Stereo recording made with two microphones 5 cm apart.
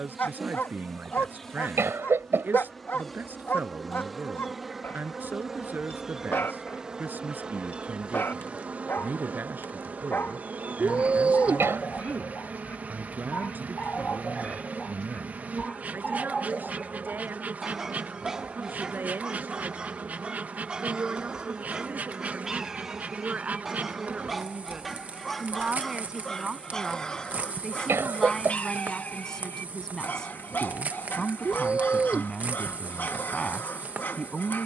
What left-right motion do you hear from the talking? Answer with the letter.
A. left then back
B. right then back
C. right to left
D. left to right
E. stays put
C.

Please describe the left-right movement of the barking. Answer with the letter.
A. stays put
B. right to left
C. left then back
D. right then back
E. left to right
D.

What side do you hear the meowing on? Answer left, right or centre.
right.